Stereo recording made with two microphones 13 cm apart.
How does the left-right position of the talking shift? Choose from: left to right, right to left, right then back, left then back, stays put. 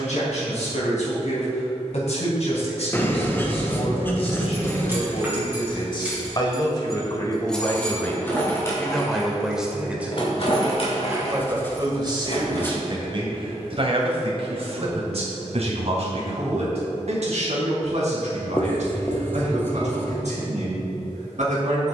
left to right.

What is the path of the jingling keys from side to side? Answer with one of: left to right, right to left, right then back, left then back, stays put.
right to left.